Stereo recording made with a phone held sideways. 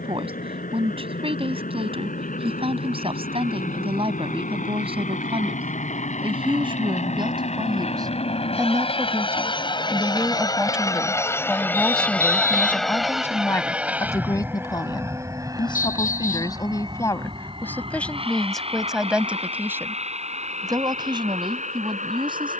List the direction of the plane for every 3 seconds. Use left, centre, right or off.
left, left, left, left, centre, right, right, right.